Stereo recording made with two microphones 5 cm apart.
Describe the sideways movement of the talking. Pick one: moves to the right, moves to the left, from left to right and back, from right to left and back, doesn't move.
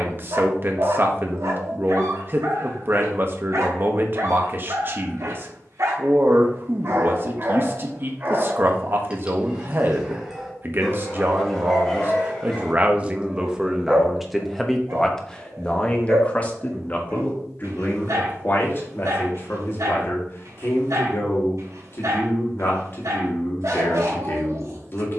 moves to the left.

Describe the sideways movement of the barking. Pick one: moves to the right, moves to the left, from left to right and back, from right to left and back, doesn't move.
from right to left and back.